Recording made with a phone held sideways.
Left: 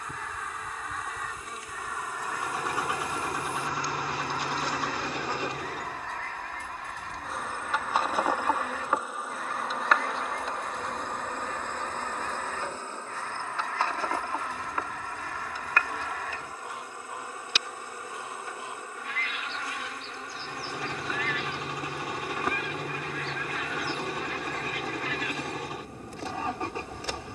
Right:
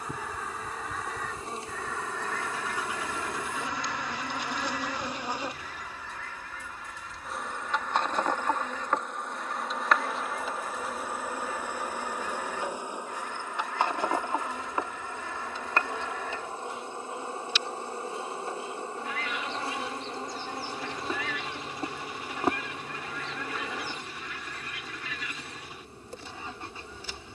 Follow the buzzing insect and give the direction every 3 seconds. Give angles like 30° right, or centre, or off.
30° right, 20° right, centre, centre, 20° right, 30° right, 30° right, 30° right, 30° right.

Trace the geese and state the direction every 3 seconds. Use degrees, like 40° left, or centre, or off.
centre, 40° left, 60° left, 60° left, 60° left, 60° left, 60° left, 60° left, 60° left.